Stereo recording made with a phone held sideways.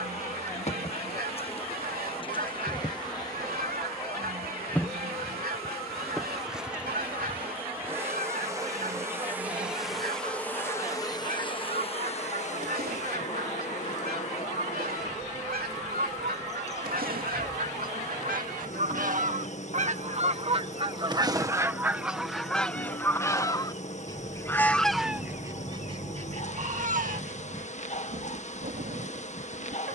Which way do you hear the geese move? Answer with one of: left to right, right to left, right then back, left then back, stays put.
left then back.